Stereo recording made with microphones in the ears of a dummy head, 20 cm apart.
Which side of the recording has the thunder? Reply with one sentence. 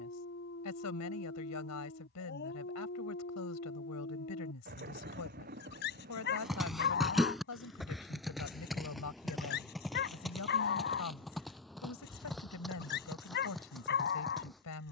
You can hear the thunder on the right.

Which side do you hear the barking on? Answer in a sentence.
You can hear the barking on the left.